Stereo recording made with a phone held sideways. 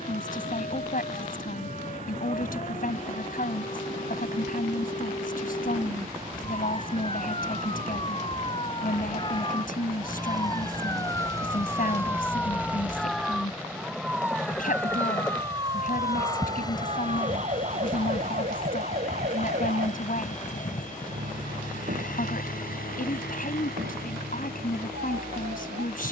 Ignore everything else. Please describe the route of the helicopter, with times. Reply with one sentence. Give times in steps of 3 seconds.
In this clip you hear the helicopter on the right from 0 s, in the centre from 12 s and on the left from 15 s.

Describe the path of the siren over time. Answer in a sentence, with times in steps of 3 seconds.
In this clip you hear the siren on the left from 0 s, in the centre from 12 s and on the right from 15 s.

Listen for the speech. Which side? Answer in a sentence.
In this clip you hear the speech on the left.